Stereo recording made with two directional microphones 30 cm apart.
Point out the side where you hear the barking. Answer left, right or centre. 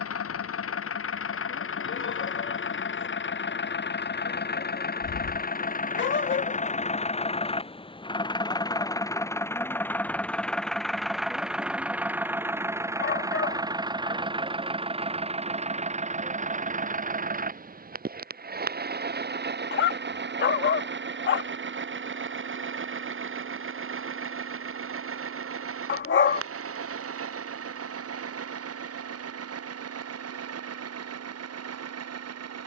left.